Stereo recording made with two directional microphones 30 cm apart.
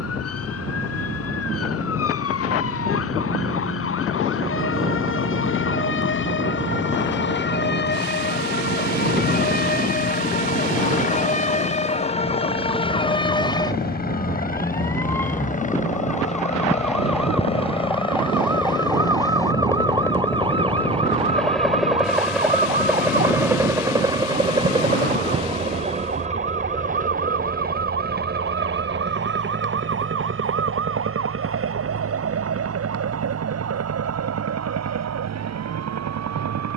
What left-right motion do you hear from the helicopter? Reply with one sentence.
You can hear the helicopter go from the left side to the right.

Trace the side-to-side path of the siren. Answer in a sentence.
You can hear the siren move to the right.